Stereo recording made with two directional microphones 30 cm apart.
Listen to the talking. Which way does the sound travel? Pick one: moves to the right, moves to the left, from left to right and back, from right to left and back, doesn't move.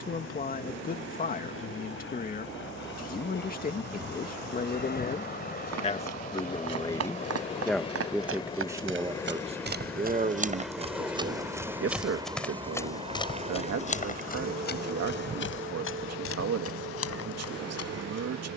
moves to the right.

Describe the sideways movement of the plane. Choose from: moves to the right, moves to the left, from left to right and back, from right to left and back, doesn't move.
moves to the right.